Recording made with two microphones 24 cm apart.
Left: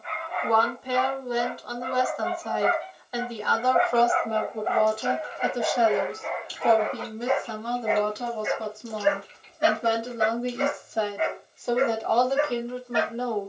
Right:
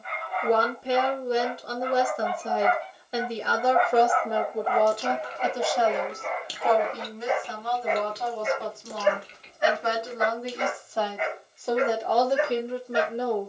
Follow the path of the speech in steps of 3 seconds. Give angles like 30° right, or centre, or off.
30° right, 10° right, 40° left, 20° left, 20° right.